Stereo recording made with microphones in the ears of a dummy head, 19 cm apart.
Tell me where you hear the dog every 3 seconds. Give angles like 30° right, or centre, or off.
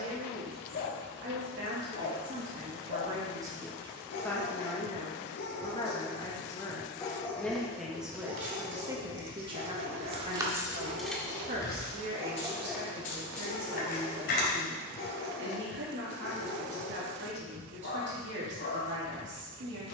60° left, 50° left, centre, 50° right, 20° left, 50° left, 50° left.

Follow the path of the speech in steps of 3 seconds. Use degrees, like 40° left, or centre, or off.
50° right, 10° left, centre, 30° right, 50° right, 60° right, 60° right.